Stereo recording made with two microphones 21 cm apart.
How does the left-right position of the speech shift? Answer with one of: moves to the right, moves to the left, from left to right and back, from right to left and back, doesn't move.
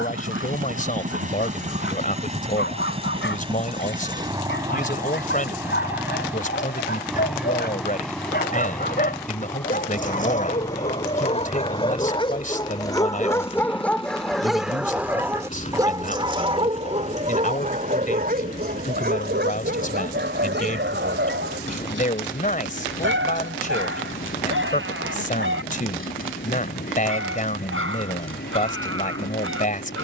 doesn't move.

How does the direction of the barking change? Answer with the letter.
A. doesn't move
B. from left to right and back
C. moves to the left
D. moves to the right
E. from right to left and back
D.